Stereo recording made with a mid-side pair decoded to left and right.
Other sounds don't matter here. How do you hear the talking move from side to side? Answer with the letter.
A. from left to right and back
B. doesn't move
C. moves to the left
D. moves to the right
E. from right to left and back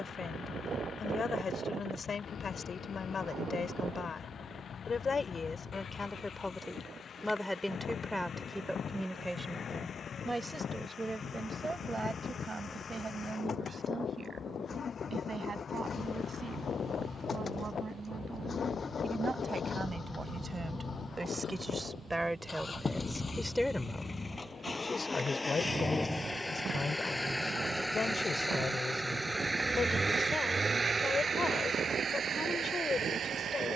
A.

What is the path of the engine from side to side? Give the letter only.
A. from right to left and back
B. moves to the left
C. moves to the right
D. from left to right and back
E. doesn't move
C.